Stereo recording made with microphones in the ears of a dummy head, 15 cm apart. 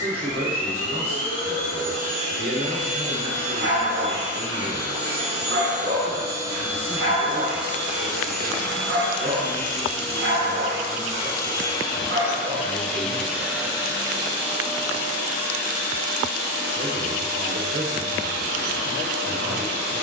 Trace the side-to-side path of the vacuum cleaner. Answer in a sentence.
In this clip you hear the vacuum cleaner move from right to left and back again.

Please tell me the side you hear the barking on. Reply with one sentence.
You can hear the barking on the right.